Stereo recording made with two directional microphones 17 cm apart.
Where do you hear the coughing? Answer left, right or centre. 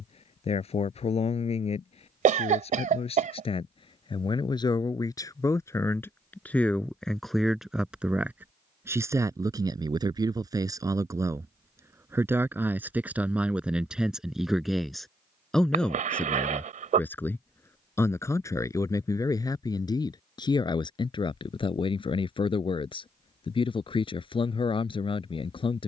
right.